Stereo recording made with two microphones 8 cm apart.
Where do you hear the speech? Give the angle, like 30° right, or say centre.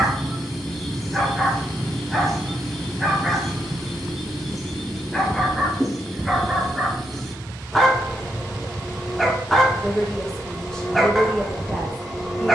10° left.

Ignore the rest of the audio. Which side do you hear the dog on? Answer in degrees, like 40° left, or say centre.
centre.